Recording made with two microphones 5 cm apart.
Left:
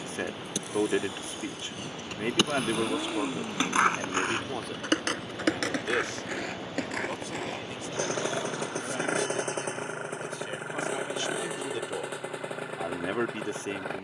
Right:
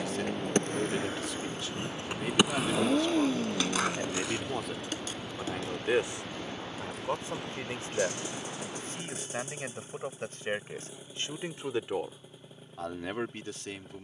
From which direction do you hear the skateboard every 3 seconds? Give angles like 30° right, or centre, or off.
30° right, 40° left, 80° left, off, off.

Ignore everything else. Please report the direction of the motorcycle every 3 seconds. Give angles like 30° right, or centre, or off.
40° right, centre, 40° left, 60° left, 70° left.